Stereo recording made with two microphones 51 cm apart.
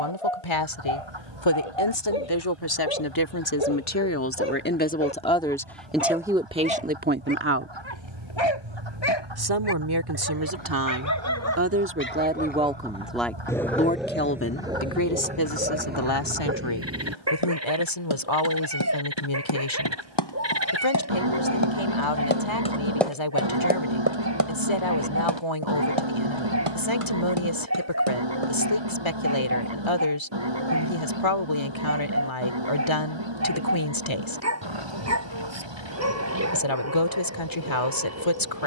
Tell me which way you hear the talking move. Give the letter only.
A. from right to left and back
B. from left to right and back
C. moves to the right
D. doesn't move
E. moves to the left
B.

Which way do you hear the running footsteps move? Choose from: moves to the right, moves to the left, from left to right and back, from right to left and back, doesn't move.
moves to the right.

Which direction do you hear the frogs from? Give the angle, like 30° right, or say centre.
50° right.